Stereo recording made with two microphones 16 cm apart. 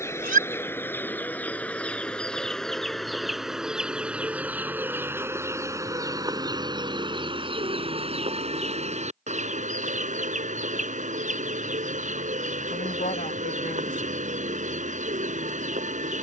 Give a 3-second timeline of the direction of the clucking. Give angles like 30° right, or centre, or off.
10° left, 10° right, 30° right, 50° right, 50° right, 50° right.